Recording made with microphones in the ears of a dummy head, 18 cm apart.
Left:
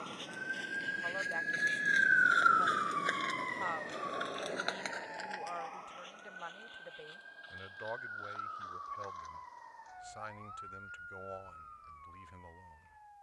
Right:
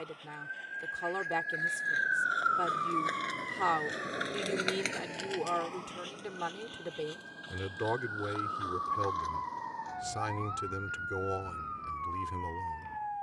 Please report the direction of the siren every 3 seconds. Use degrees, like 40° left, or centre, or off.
40° left, 30° right, 60° right, 70° right, 70° right.